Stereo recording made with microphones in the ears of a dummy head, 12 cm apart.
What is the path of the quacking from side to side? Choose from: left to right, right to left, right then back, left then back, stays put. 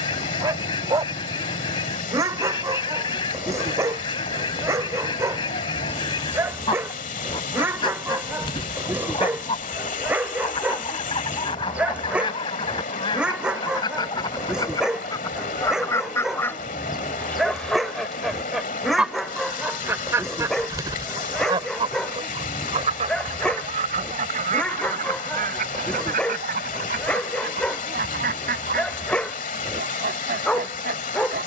left to right.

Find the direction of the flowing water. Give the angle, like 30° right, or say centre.
60° left.